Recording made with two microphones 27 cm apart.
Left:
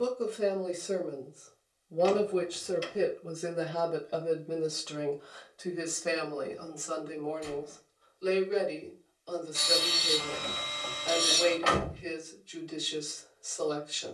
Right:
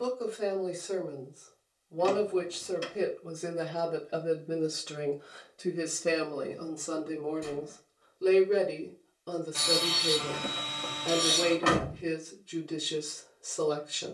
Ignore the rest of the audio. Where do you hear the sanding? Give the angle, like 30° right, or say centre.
60° right.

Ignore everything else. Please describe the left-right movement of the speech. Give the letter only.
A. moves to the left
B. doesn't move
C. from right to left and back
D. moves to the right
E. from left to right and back
D.